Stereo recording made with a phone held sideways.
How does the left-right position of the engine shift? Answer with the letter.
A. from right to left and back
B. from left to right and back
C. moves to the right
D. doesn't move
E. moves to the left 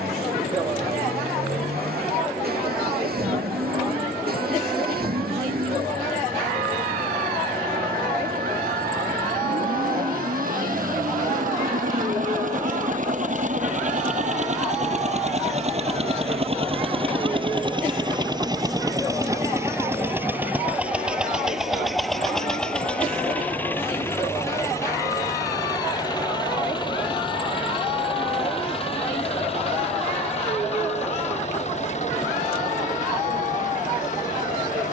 E.